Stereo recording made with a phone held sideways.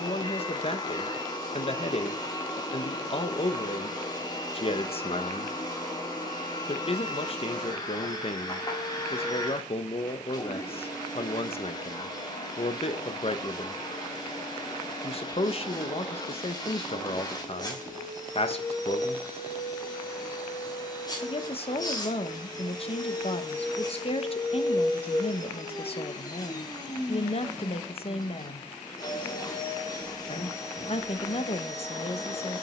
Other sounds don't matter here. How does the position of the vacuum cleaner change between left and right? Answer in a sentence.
In this clip you hear the vacuum cleaner stay put.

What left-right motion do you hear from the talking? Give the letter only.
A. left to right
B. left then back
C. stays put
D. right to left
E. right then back
C.